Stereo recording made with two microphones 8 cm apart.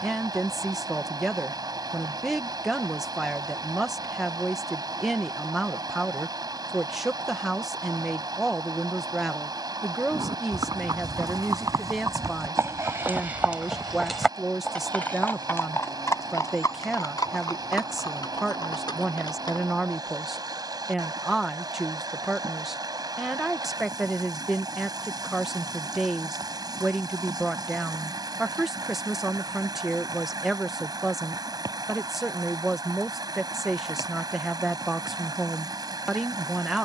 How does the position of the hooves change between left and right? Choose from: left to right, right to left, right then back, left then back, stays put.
right to left.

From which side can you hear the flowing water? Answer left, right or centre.
right.